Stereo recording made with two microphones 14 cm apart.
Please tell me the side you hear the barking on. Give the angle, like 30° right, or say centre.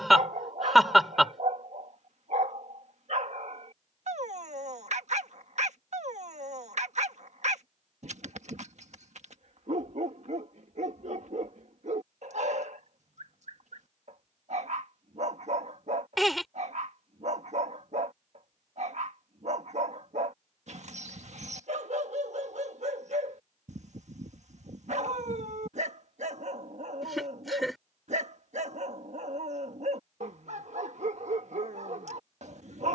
60° right.